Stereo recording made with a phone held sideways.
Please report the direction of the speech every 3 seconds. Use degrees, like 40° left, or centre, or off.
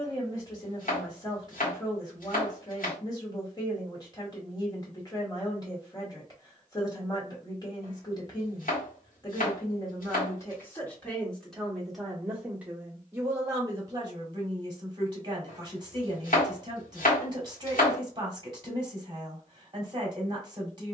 30° left, 30° left, 30° left, 20° left, 20° right, 30° right, 30° right.